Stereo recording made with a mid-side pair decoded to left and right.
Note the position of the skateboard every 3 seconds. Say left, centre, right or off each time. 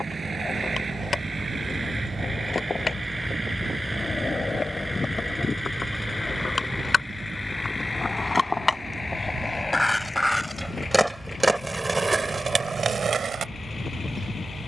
left, left, left, centre, right.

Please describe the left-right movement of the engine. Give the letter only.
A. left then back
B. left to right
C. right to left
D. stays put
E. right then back
C.